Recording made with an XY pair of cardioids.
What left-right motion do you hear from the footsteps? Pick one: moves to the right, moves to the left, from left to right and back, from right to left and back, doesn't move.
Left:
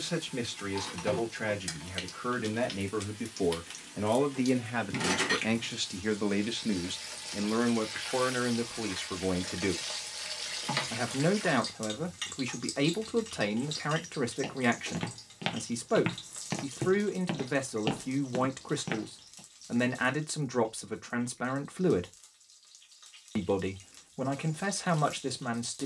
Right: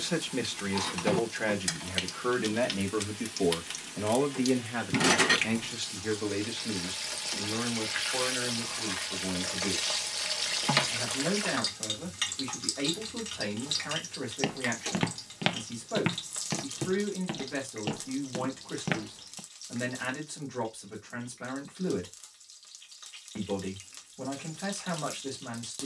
from right to left and back.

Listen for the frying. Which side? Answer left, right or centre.
right.